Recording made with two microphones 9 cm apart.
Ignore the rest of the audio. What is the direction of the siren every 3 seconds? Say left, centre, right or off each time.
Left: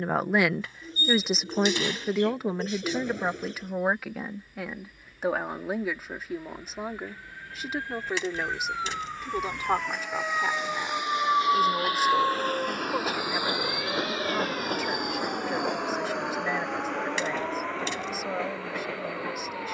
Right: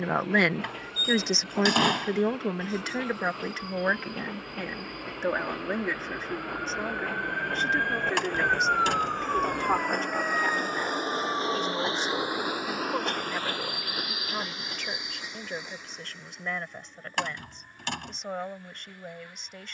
right, right, right, centre, left, left, left.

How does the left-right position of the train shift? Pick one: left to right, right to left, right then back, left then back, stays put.
right to left.